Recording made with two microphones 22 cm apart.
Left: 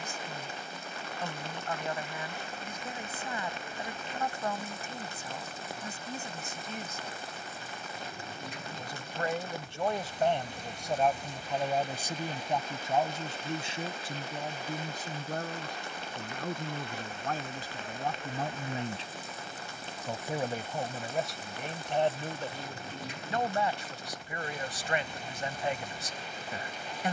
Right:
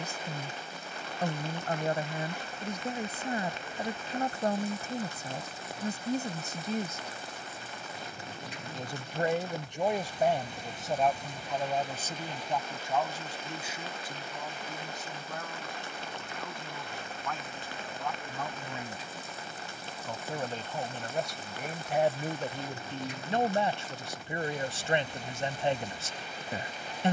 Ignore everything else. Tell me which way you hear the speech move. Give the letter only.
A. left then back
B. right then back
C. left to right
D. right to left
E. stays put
A.